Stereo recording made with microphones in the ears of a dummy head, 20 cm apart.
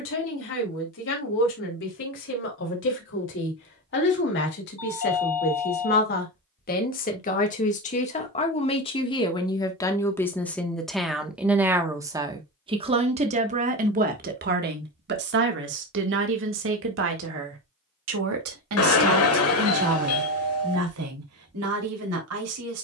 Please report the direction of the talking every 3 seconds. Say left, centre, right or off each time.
left, left, left, centre, right, right, right, right.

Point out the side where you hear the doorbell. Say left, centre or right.
left.